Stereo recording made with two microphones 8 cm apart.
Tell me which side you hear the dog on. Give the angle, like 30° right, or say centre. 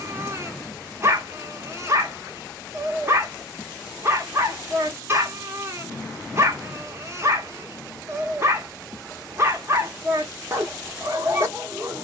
30° right.